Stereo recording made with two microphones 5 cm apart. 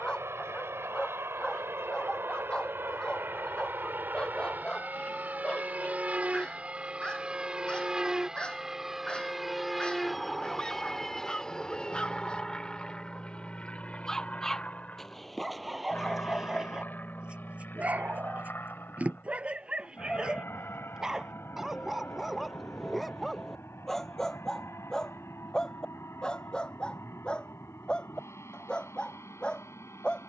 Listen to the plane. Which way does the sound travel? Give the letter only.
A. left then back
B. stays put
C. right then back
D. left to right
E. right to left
E.